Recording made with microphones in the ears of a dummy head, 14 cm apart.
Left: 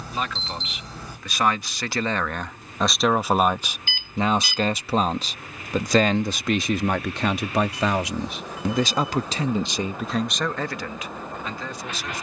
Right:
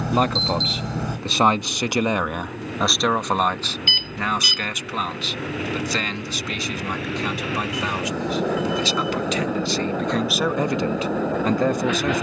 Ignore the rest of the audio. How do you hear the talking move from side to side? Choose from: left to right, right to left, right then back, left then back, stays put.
left then back.